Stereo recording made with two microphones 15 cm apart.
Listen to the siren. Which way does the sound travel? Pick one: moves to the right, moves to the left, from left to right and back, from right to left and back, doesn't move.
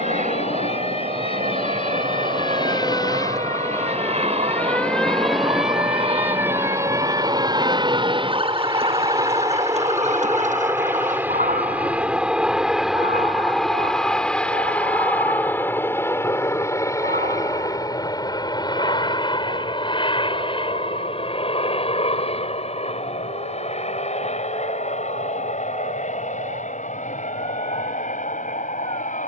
moves to the right.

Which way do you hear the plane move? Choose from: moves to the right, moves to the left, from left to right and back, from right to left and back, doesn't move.
moves to the left.